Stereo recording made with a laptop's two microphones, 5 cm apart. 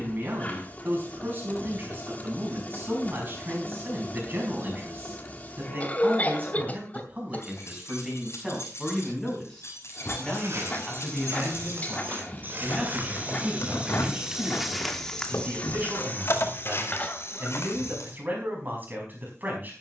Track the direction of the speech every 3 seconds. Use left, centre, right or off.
right, right, right, centre, right, right, right.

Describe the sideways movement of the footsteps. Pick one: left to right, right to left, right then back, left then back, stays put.
right to left.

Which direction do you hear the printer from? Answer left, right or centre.
left.